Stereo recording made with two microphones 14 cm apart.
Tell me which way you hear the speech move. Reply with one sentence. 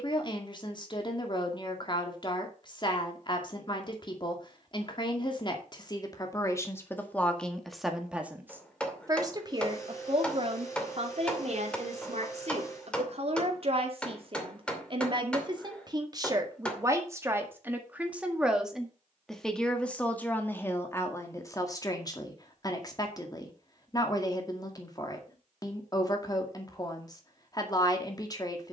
In this clip you hear the speech go right and come back.